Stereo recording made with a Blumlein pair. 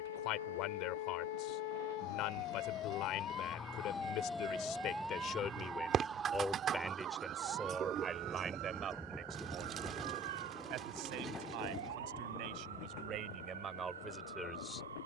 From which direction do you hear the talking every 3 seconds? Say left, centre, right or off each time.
left, left, centre, right, right.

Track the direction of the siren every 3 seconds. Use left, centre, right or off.
left, centre, right, right, right.